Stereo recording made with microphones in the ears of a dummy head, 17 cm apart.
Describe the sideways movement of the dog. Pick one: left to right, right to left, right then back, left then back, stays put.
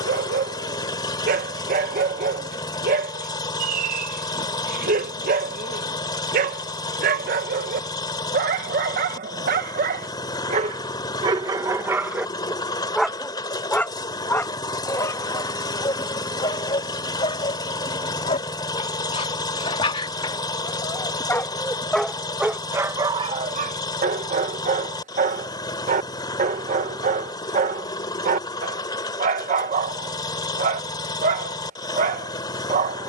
left then back.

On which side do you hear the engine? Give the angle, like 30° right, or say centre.
20° left.